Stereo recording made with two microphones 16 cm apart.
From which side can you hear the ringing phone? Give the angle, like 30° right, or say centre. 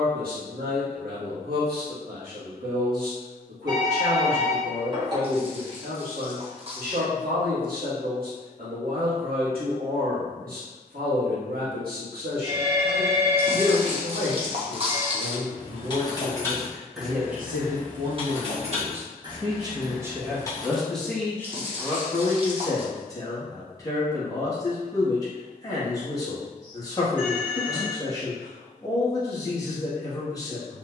30° right.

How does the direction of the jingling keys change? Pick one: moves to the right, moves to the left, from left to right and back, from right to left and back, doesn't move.
from left to right and back.